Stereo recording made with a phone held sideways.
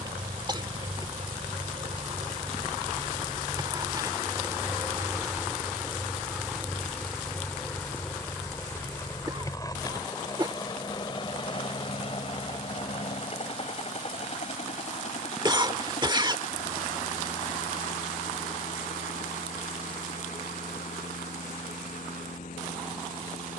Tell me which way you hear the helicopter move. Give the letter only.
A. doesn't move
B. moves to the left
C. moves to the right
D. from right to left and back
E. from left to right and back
B.